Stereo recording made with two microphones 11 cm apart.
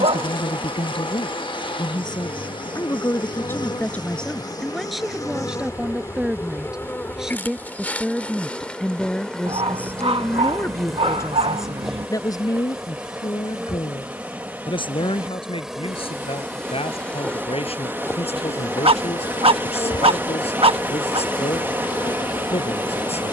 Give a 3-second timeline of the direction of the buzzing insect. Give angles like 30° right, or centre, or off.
50° left, 40° left, 20° left, centre, 10° right, centre, 40° left, 40° left.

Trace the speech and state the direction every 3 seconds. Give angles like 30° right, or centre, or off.
50° left, 10° left, centre, 20° left, 40° left, 60° left, 70° left, 70° left.